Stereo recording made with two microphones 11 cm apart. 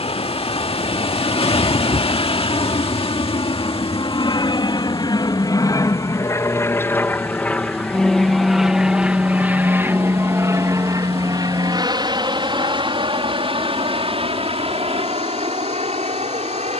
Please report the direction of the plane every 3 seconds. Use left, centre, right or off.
left, left, centre, right, right, right.